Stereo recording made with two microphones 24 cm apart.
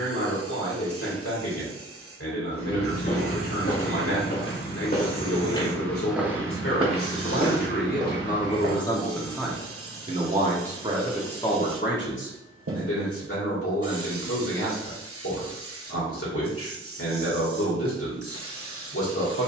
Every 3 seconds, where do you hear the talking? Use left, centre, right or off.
left, left, left, centre, left, left, left.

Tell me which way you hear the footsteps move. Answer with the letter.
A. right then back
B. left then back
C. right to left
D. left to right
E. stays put
D.